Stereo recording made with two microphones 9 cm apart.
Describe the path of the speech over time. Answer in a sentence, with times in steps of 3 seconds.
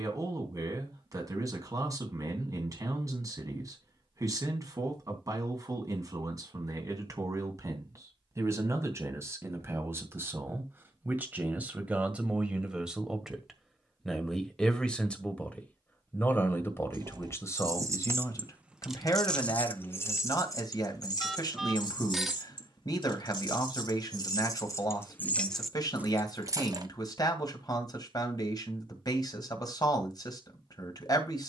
In this clip you hear the speech on the right from 0 s, in the centre from 12 s and on the left from 15 s.